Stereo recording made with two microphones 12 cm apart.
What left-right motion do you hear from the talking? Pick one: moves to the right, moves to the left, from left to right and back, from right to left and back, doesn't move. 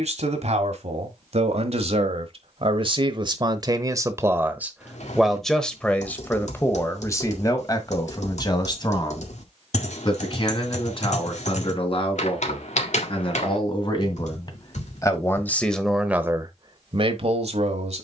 from right to left and back.